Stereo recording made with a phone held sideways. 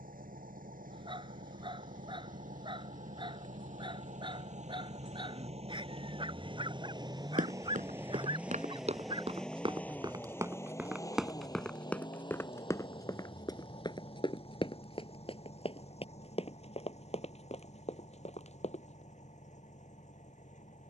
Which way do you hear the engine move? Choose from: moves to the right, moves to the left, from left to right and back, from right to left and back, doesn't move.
moves to the left.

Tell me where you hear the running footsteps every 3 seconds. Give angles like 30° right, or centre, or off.
off, off, 60° right, 20° right, 30° left, 40° left, 50° left.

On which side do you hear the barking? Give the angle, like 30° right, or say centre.
40° right.